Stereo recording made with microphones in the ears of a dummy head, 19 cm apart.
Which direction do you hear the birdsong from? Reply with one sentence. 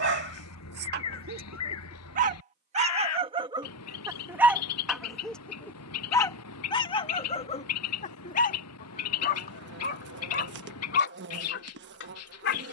In this clip you hear the birdsong on the left.